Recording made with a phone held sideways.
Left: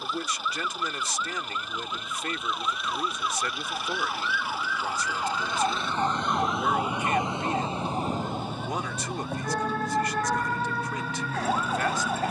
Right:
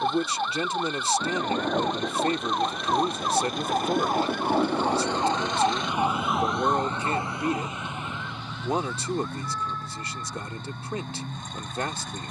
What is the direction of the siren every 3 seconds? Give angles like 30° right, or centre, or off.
60° right, 30° right, 20° left, 60° left.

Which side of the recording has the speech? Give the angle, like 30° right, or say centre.
30° right.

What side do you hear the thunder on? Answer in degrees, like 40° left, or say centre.
80° right.